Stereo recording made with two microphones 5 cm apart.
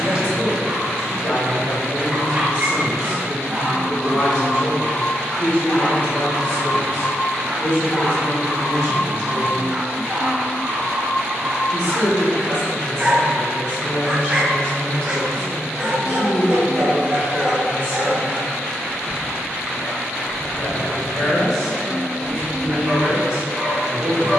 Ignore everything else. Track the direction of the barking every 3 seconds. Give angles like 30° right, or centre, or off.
20° right, centre, 10° left, 20° right, 20° right, 20° right, 20° right, 20° right.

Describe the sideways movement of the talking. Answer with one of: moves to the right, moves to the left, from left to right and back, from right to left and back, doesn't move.
moves to the right.